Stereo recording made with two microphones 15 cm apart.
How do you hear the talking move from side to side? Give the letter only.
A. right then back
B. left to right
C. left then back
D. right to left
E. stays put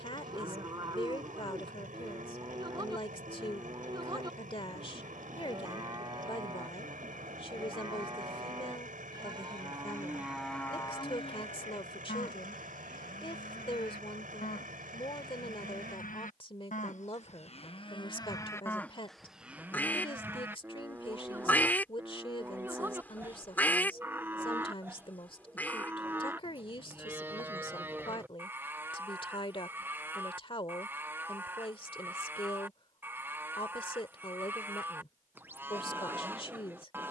E.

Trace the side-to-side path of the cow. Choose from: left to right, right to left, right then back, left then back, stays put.
left then back.